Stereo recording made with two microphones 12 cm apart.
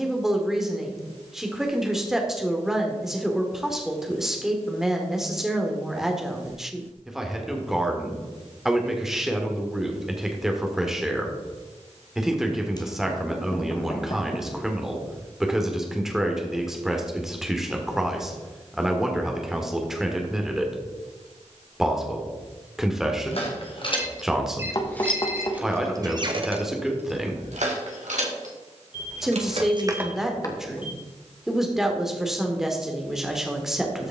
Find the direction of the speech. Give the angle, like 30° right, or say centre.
centre.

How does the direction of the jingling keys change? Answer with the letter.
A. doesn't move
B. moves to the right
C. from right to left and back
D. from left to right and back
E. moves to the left
D.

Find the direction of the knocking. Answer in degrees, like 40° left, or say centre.
30° left.